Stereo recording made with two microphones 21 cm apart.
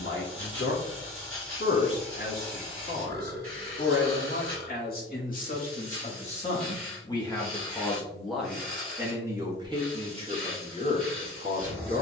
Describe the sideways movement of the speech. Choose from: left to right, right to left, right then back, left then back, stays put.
left to right.